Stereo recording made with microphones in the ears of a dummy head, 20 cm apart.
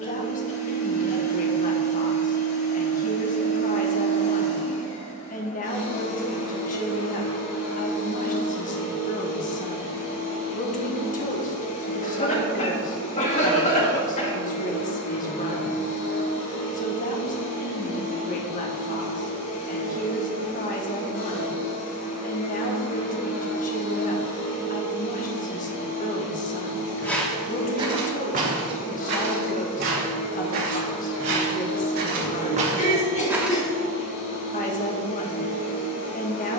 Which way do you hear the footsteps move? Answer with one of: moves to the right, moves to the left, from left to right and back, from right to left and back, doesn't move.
from left to right and back.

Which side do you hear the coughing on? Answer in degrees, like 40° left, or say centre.
30° left.